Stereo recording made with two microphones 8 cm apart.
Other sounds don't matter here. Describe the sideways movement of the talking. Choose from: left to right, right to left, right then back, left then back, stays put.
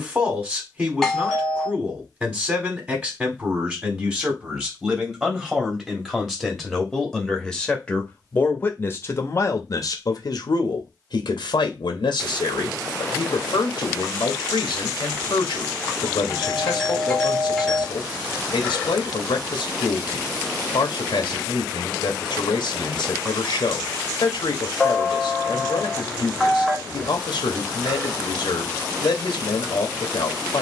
right to left.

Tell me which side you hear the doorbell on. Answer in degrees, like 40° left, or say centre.
centre.